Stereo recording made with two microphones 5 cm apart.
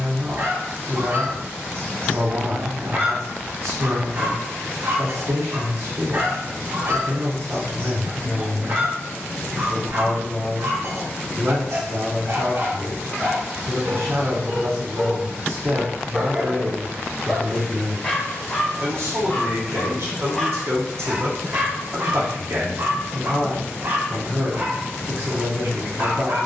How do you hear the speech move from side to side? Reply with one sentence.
You can hear the speech stay put.